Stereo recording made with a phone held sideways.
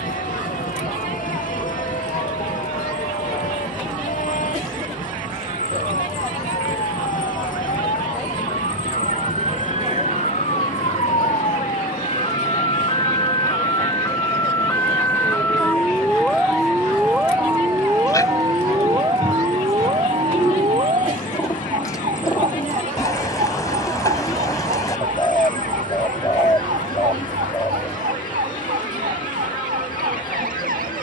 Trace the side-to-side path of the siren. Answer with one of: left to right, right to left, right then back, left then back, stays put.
left to right.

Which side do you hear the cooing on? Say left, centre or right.
left.